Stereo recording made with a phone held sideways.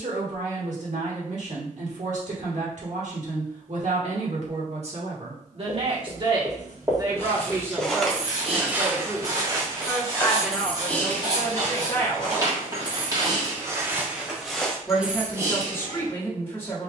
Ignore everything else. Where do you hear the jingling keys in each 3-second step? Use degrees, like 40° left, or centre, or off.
off, off, 50° right, centre, 20° left, 30° right.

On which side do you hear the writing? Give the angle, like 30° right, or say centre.
30° right.